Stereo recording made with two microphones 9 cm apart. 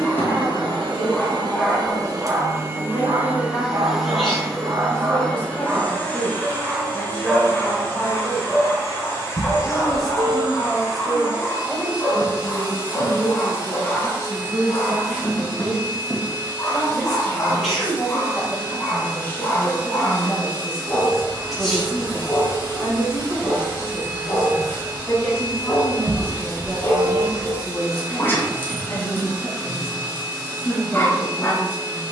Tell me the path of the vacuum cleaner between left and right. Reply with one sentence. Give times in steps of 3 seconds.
In this clip you hear the vacuum cleaner on the right from 0 s, in the centre from 3 s and on the left from 6 s.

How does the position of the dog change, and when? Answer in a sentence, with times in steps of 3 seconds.
You can hear the dog in the centre from 0 s, on the right from 3 s, in the centre from 6 s and on the left from 9 s.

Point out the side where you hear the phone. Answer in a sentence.
You can hear the phone on the right.